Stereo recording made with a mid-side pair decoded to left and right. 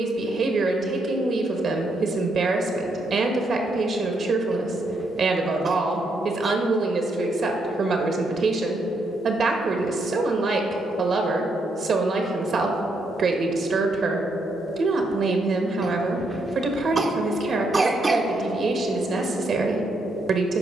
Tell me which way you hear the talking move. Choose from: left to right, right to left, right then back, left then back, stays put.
stays put.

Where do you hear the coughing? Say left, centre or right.
right.